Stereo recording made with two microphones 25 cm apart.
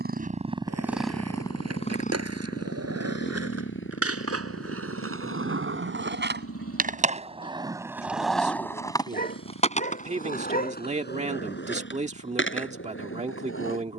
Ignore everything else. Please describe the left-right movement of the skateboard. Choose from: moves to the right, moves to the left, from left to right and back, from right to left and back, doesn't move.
moves to the left.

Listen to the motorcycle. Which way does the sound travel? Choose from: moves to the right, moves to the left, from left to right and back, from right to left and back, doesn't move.
moves to the left.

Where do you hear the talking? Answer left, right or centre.
right.